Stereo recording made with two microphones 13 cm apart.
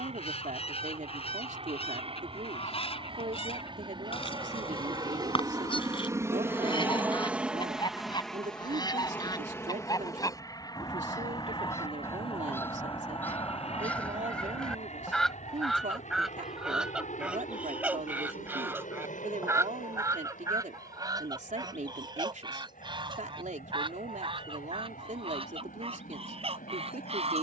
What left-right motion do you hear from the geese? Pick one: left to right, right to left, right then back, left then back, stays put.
left to right.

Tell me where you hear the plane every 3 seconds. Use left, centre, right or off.
right, right, centre, left, left, left, left, left, left.